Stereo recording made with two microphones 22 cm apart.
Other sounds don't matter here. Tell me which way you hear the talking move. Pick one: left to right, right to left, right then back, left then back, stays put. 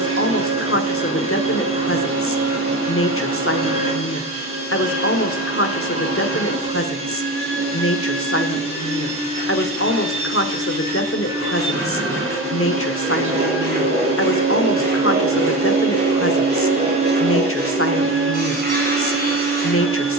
stays put.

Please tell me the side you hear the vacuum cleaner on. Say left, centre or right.
right.